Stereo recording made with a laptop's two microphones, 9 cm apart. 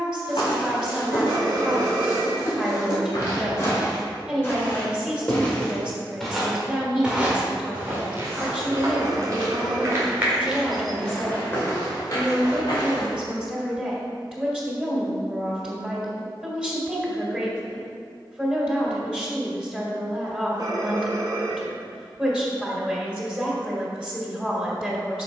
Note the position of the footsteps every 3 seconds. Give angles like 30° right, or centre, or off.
50° left, 30° left, 20° right, 10° right, 50° left, off, off, off, off.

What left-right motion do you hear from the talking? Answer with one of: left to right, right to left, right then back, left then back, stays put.
stays put.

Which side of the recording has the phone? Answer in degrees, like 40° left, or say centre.
40° right.